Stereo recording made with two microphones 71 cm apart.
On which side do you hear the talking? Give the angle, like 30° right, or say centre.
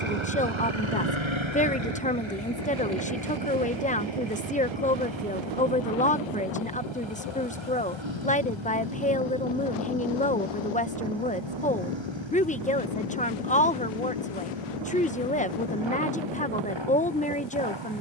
10° left.